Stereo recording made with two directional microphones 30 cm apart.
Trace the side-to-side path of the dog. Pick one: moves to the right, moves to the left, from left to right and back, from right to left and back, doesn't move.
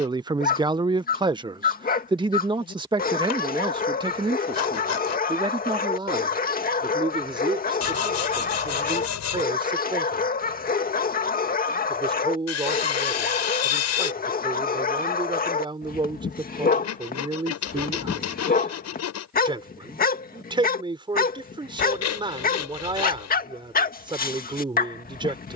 doesn't move.